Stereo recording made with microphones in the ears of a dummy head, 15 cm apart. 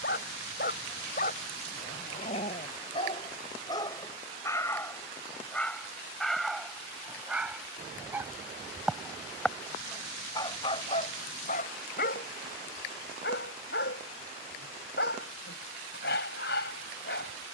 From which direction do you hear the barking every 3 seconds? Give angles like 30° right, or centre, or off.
50° left, 20° left, centre, 30° left, 60° left, 70° left.